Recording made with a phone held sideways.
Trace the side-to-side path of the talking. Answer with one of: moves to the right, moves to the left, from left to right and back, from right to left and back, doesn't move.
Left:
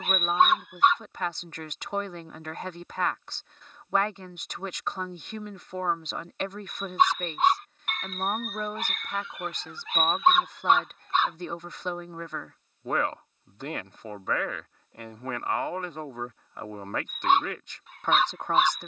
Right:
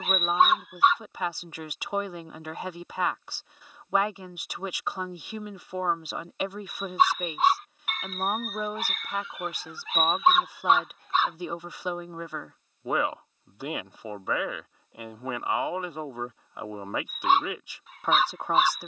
doesn't move.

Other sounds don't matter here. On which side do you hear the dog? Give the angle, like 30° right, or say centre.
centre.